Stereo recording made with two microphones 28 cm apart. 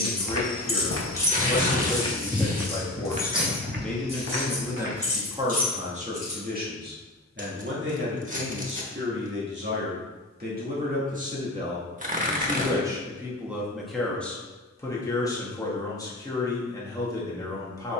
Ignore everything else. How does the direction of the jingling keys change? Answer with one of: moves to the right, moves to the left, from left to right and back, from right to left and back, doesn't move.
moves to the right.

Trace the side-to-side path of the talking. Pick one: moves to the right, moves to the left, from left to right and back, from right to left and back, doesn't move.
from left to right and back.